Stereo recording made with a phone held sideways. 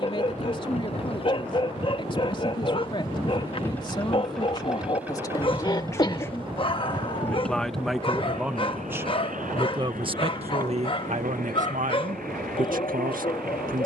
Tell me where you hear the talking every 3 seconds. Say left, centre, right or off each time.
left, left, centre, right, right.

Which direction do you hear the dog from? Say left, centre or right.
left.